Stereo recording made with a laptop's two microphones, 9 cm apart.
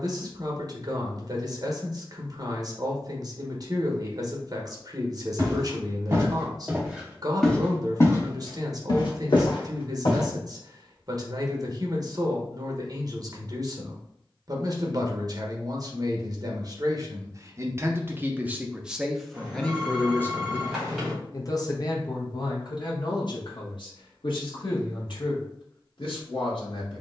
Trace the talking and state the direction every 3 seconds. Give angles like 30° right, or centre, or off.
50° right, 50° right, 50° right, 50° right, 50° right, 40° right, centre, 50° left, 70° left.